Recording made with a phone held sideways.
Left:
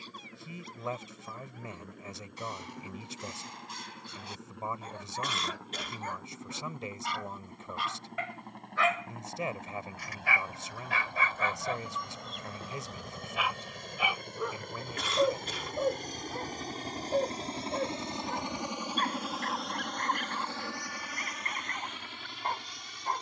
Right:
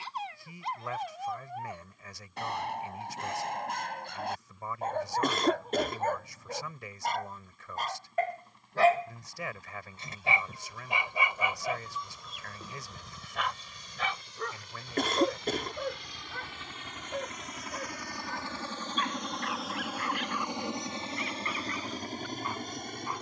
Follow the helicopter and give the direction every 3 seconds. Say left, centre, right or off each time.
left, left, left, left, left, left, centre, right.